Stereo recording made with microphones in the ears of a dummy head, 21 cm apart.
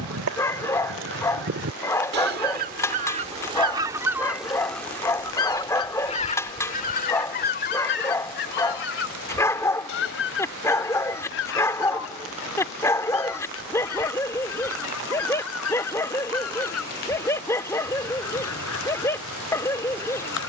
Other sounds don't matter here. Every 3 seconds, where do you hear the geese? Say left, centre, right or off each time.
right, centre, left, left, left, left, left.